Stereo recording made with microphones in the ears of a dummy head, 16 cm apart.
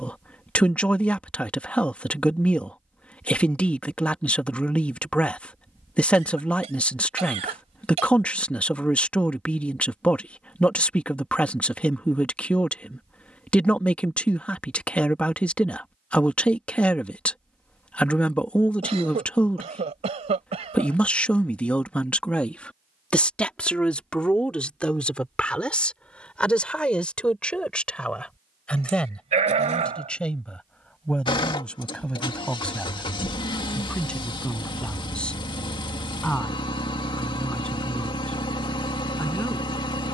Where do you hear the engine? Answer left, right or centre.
left.